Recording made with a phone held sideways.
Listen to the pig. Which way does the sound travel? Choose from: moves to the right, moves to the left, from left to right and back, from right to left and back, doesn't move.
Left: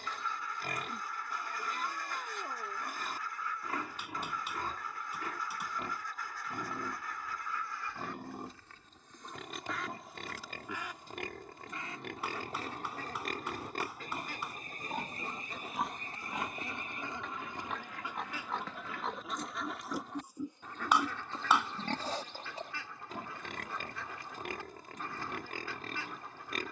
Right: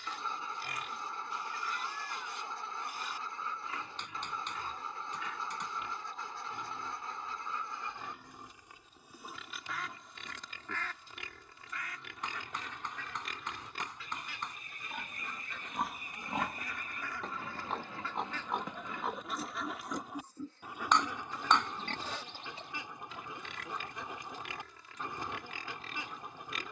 from left to right and back.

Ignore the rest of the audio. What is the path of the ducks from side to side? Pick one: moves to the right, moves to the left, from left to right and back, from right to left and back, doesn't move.
from right to left and back.